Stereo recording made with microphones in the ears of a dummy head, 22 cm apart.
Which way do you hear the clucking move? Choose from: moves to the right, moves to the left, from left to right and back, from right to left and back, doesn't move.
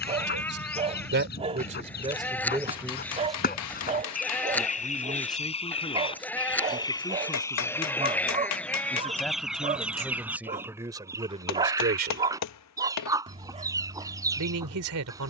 moves to the right.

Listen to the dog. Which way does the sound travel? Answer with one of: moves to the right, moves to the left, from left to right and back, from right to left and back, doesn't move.
doesn't move.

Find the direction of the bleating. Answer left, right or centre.
centre.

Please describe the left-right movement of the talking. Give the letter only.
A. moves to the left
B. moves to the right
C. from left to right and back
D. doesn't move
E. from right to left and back
E.